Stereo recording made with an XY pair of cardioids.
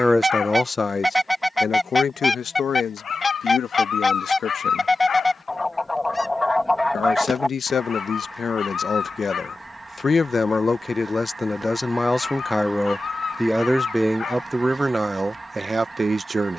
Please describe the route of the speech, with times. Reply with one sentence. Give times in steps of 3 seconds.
You can hear the speech on the left from 0 s, in the centre from 12 s and on the right from 15 s.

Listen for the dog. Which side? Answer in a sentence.
In this clip you hear the dog on the left.